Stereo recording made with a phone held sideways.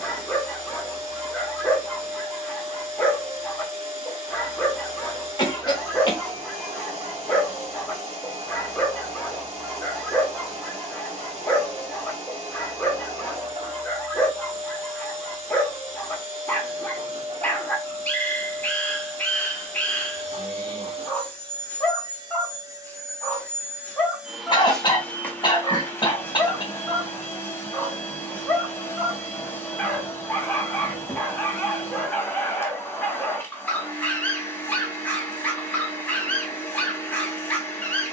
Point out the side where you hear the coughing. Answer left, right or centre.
left.